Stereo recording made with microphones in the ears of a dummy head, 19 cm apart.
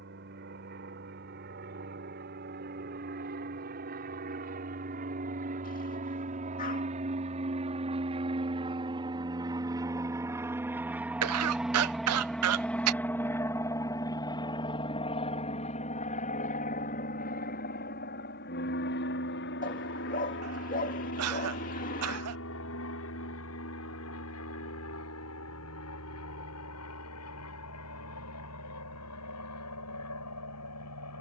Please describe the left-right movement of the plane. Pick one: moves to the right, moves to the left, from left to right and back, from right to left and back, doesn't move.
moves to the left.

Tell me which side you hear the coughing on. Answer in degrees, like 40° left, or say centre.
80° right.